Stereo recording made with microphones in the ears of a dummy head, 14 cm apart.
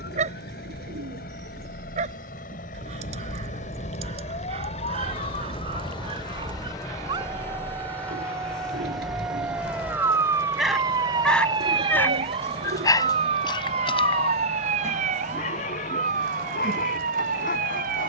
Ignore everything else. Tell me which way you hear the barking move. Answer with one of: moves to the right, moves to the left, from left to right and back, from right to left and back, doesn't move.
moves to the left.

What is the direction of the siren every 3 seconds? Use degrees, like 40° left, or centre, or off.
60° left, 40° left, 10° left, 20° right, 40° right, 50° right.